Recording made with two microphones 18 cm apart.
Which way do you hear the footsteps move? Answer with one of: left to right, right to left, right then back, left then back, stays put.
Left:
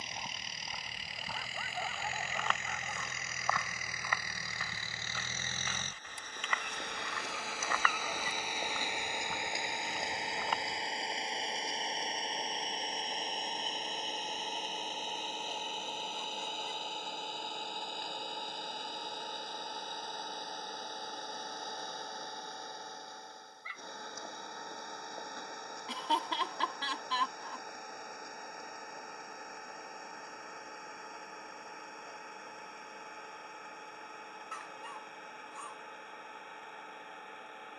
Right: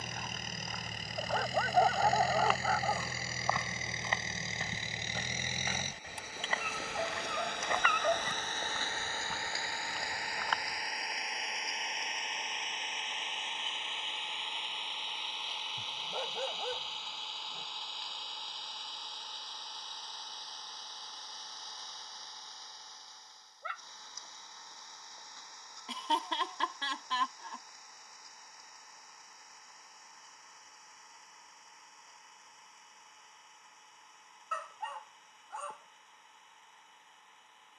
right then back.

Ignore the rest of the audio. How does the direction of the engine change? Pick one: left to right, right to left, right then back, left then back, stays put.
right to left.